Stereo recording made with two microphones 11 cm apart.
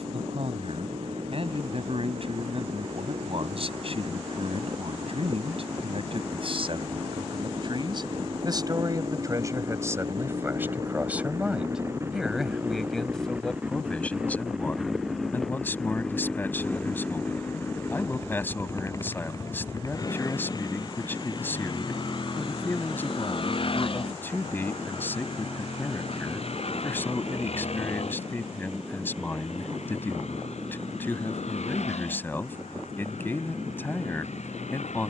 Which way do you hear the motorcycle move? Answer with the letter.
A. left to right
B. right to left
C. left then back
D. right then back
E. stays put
B.